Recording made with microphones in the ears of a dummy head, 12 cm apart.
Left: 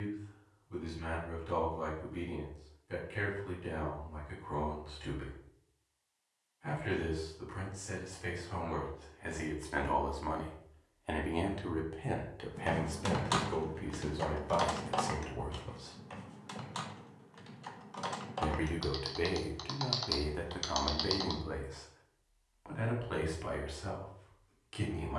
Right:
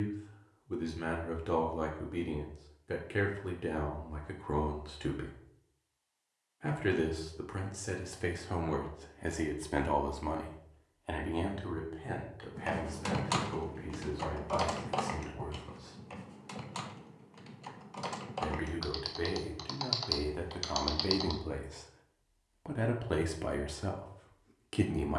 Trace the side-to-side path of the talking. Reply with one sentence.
In this clip you hear the talking go left and come back.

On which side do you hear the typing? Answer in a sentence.
In this clip you hear the typing in the centre.